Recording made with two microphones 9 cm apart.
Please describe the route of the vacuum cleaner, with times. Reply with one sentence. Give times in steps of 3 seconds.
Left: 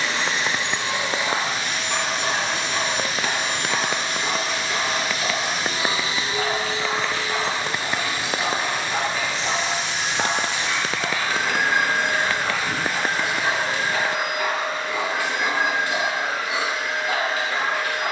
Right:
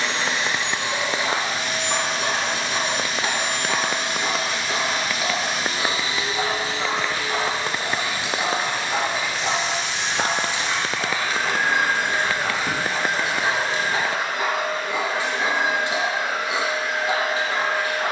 You can hear the vacuum cleaner on the right from 0 s, in the centre from 9 s and on the right from 12 s.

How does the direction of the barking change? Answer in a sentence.
You can hear the barking stay put.